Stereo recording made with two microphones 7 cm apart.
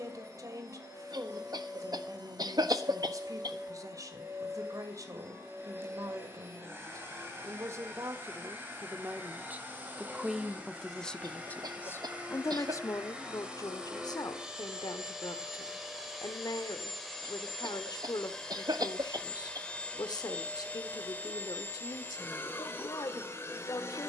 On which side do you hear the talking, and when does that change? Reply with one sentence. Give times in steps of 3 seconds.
You can hear the talking on the right from 0 s, in the centre from 9 s and on the left from 12 s.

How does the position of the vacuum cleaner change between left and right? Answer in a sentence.
In this clip you hear the vacuum cleaner move to the left.